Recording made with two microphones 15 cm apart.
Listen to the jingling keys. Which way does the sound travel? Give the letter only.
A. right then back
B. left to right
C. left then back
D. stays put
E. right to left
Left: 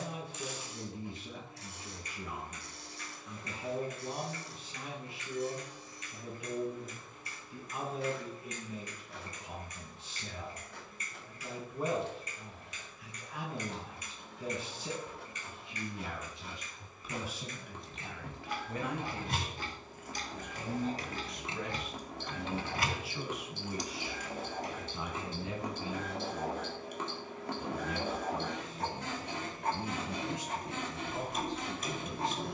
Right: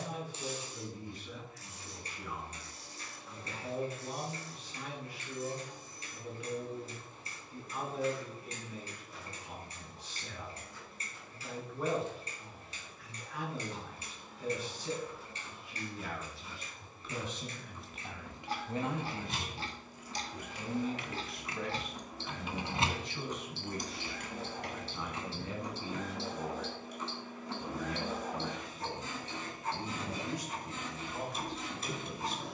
B.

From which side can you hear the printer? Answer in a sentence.
In this clip you hear the printer on the left.